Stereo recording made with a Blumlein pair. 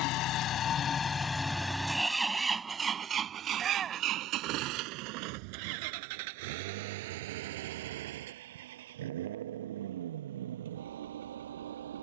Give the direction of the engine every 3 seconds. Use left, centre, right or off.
centre, right, right, right.